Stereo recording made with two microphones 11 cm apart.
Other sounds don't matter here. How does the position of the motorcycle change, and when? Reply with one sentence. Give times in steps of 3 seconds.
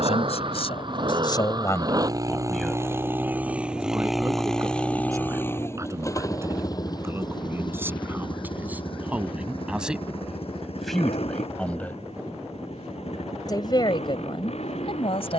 You can hear the motorcycle on the right from 0 s, in the centre from 3 s and on the left from 6 s.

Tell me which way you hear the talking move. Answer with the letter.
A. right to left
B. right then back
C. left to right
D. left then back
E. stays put
B.